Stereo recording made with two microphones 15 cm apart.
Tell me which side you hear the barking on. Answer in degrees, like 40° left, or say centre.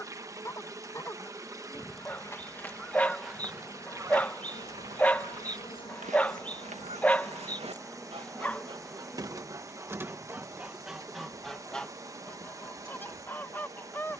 10° left.